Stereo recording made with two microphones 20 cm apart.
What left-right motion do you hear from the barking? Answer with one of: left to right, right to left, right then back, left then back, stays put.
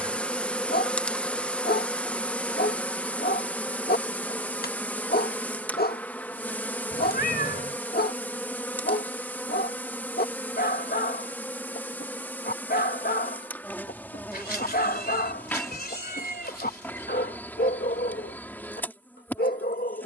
stays put.